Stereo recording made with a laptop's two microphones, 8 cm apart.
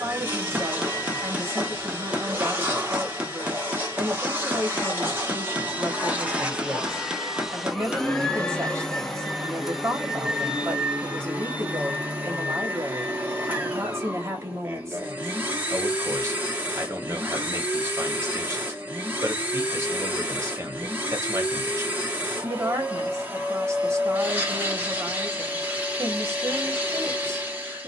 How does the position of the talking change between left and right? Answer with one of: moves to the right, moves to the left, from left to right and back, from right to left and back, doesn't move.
doesn't move.